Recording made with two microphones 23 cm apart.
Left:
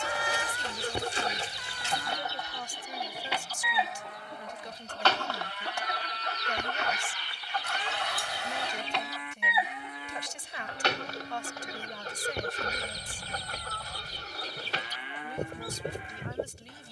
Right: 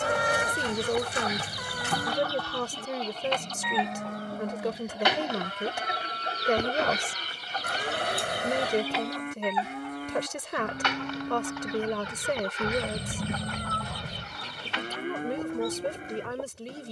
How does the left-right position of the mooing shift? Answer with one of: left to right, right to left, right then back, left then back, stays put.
stays put.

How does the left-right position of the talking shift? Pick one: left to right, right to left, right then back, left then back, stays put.
stays put.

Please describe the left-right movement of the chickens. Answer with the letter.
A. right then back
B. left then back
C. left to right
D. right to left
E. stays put
A.